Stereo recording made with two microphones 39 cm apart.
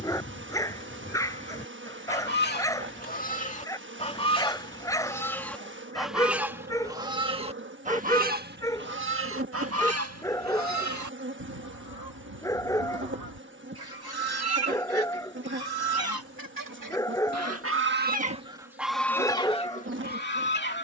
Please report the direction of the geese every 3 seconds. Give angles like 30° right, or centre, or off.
30° left, 10° left, 10° right, 40° right, 60° right, 50° right, 10° left.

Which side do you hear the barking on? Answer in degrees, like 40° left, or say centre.
10° left.